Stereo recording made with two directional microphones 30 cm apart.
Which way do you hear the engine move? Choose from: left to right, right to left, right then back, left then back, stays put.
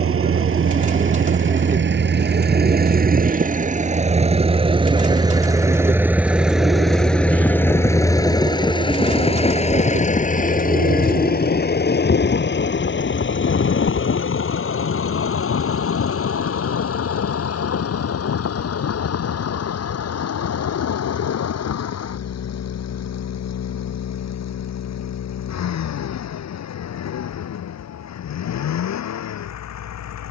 right to left.